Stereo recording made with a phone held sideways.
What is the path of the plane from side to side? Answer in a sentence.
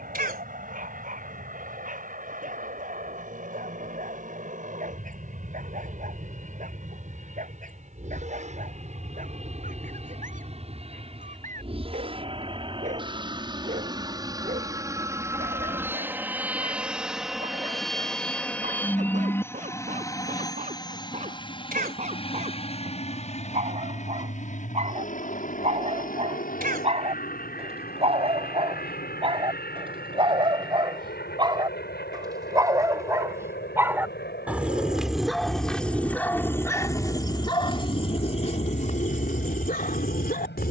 You can hear the plane move from right to left.